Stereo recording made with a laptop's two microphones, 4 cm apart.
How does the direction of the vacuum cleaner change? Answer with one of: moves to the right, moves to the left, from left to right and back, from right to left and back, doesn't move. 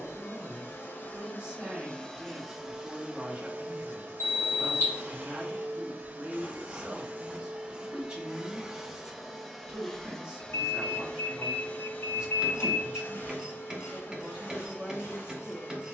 from left to right and back.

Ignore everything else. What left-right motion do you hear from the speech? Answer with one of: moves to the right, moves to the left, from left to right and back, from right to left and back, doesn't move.
doesn't move.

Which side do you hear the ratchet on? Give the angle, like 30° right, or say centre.
10° right.